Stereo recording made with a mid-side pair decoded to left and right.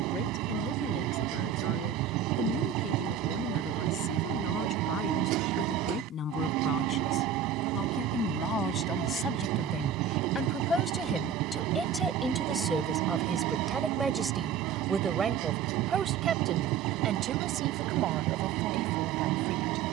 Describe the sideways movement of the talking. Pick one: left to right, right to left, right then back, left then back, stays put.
left to right.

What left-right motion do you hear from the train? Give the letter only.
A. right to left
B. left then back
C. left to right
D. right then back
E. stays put
E.